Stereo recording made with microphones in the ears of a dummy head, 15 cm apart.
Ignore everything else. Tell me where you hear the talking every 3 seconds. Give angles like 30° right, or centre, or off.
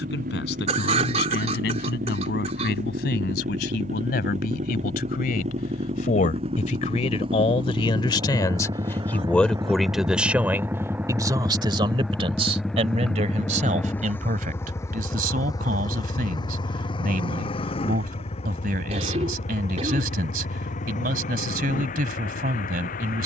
70° left, 60° left, 30° left, 10° right, 40° right, 50° right, 50° right, 50° right.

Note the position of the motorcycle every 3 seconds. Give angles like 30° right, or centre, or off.
60° right, 50° right, 30° right, 10° right, 10° left, 30° left, 40° left, 50° left.